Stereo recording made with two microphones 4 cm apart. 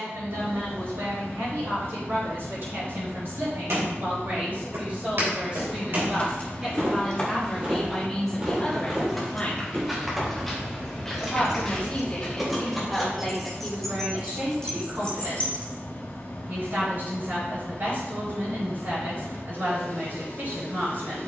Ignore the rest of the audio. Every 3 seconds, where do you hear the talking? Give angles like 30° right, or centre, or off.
50° right, 40° right, centre, 30° left, 10° right, 50° right, 50° right.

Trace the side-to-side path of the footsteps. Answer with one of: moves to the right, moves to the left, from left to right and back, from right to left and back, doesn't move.
moves to the left.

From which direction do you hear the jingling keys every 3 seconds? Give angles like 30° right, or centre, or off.
off, off, 20° left, centre, 10° left, 30° left, off.